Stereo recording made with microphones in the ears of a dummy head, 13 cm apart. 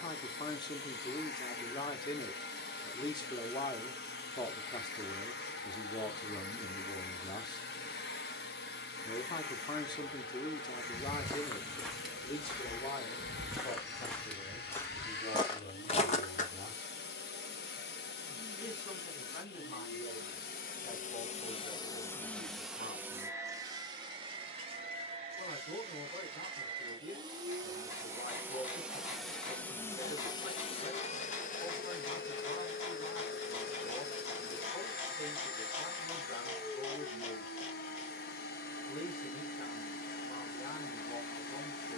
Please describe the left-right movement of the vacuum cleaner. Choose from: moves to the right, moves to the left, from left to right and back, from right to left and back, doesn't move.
from left to right and back.